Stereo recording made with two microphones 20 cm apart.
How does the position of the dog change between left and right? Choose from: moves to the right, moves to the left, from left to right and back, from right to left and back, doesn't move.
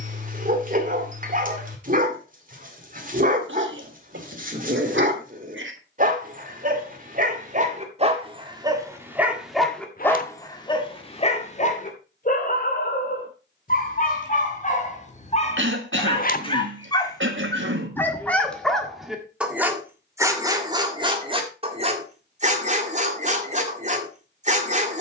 from right to left and back.